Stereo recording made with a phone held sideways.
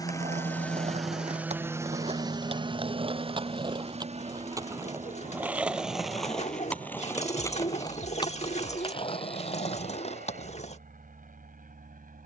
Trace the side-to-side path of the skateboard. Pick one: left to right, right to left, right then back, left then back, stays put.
right to left.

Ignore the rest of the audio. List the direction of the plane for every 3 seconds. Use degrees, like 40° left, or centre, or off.
10° right, 50° right, 60° right, 60° right.